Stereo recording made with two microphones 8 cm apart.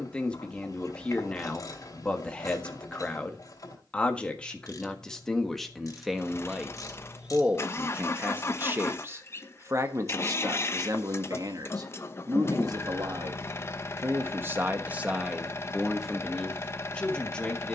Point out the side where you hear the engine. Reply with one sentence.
You can hear the engine on the left.